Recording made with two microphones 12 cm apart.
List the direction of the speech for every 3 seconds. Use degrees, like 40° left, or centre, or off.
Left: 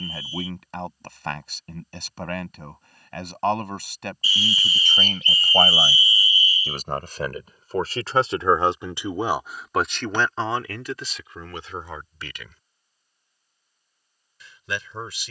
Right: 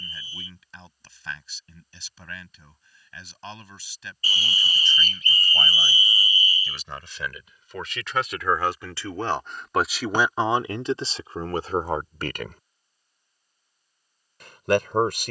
60° left, 60° left, 40° left, 20° right, 50° right.